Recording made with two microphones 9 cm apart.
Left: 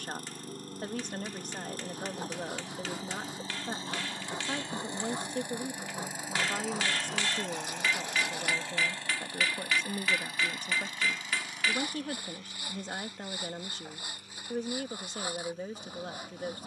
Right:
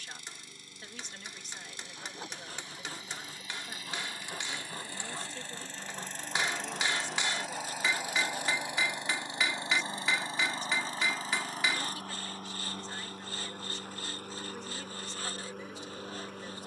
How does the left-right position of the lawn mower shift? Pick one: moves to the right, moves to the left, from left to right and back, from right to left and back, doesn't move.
moves to the right.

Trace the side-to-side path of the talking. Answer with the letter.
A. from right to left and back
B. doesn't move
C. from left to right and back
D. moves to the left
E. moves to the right
B.